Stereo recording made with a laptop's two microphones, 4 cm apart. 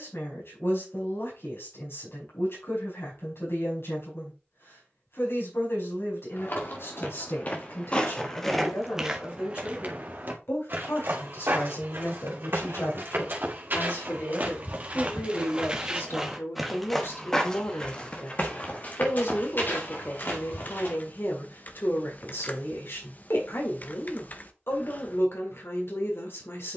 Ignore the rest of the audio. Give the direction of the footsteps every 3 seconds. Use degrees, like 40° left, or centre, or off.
off, off, 30° left, 50° right, 50° right, 10° right, 40° left, off, off.